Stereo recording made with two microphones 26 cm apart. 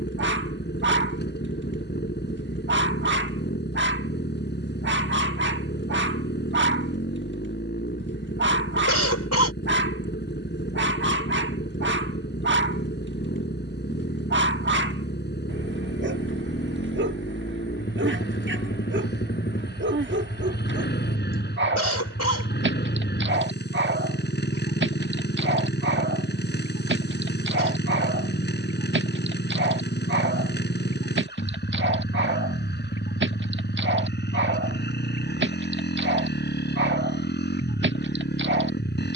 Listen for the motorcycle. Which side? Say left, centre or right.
left.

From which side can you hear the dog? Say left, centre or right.
right.